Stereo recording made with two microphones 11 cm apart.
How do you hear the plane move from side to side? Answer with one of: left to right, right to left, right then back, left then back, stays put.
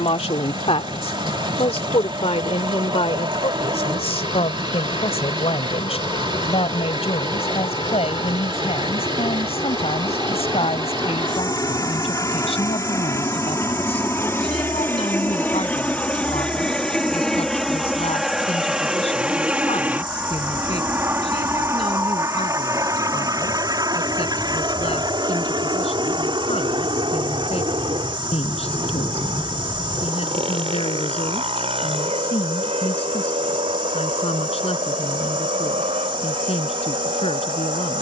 left to right.